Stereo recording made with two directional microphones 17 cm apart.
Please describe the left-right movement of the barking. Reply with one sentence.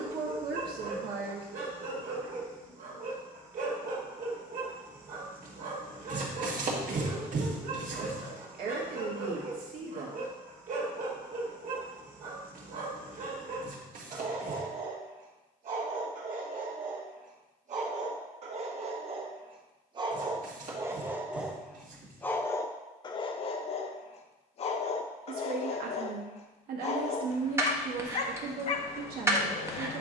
In this clip you hear the barking move from right to left.